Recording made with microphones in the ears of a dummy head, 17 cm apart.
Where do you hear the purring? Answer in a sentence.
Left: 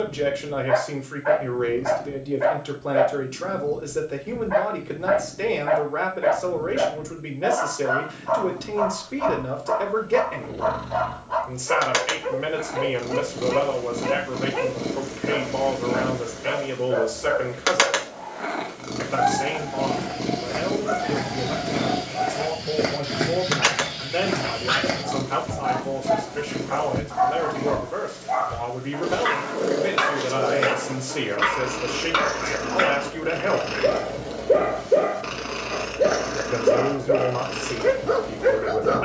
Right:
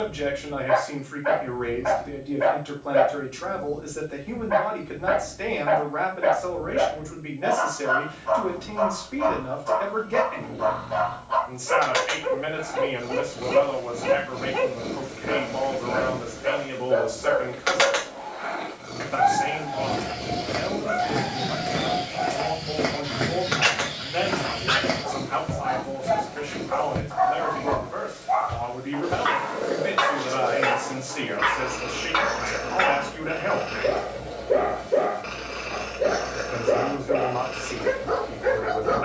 You can hear the purring on the left.